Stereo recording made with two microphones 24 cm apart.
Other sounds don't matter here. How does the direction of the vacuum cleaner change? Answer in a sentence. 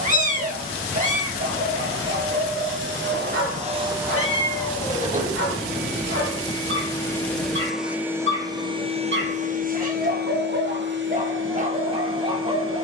In this clip you hear the vacuum cleaner move from right to left and back again.